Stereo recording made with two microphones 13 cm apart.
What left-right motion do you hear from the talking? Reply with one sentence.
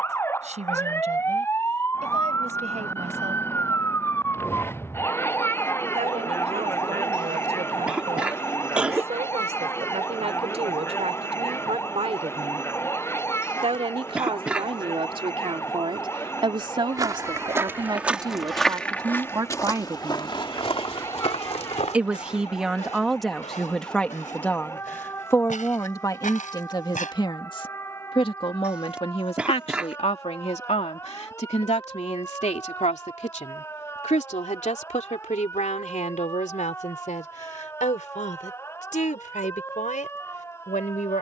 In this clip you hear the talking move to the left.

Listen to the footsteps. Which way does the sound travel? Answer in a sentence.
You can hear the footsteps move from right to left.